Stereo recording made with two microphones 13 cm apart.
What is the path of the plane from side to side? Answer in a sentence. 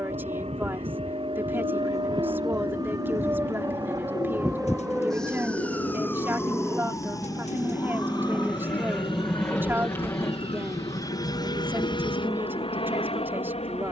You can hear the plane travel towards the left.